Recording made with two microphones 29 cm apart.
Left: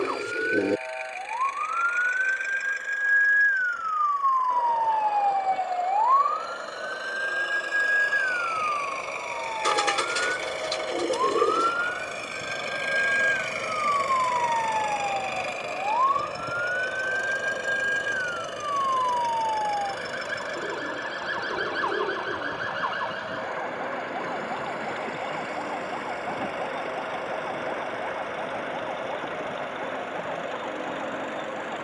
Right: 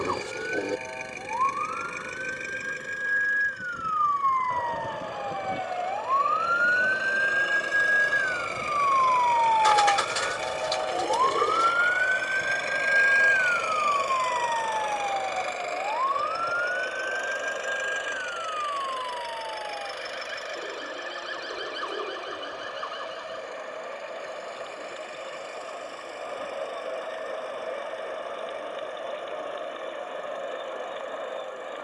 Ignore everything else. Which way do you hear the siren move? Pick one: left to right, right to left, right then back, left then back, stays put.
right to left.